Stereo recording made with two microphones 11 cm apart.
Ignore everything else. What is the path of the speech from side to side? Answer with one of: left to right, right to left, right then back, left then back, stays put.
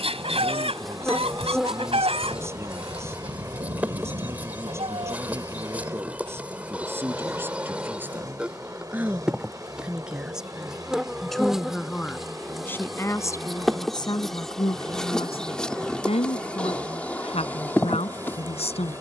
right to left.